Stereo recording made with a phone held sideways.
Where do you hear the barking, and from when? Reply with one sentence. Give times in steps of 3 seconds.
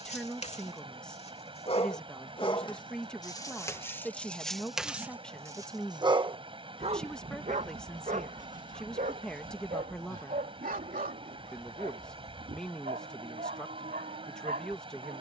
In this clip you hear the barking on the left from 0 s, in the centre from 3 s and on the right from 6 s.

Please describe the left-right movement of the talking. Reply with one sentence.
In this clip you hear the talking stay put.